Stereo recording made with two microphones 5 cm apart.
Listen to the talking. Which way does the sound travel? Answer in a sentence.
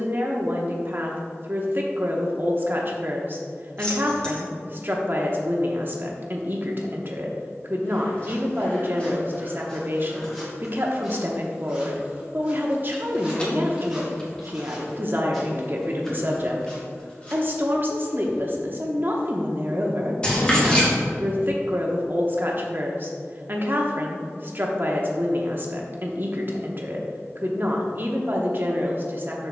In this clip you hear the talking stay in one place.